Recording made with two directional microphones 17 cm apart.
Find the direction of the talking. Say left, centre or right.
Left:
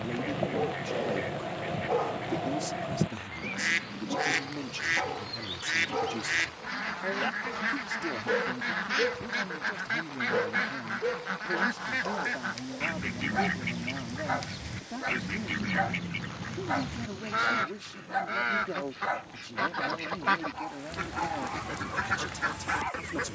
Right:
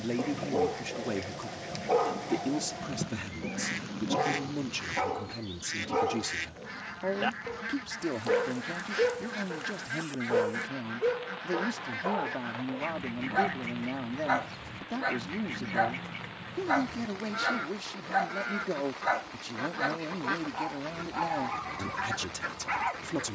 right.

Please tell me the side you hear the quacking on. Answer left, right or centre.
left.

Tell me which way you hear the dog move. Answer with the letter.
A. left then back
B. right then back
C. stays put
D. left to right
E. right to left
C.